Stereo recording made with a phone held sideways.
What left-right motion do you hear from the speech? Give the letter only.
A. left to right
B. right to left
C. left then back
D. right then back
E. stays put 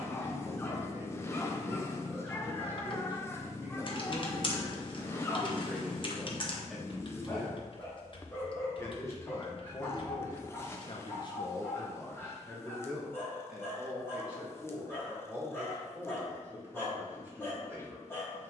C.